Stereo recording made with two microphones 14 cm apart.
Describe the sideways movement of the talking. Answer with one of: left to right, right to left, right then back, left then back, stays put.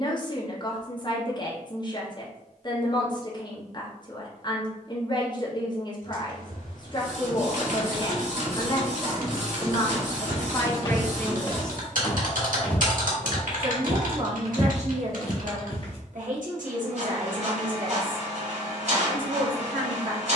left to right.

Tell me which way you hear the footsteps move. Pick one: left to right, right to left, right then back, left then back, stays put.
right then back.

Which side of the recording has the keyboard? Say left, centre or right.
right.